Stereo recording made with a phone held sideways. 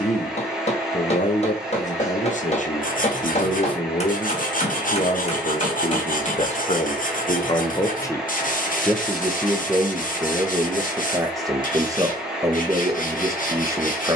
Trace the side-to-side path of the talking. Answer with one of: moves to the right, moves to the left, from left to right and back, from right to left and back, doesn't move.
moves to the right.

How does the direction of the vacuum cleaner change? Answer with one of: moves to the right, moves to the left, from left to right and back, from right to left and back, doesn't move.
doesn't move.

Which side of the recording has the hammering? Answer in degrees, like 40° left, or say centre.
40° left.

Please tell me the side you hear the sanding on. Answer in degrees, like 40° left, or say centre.
60° left.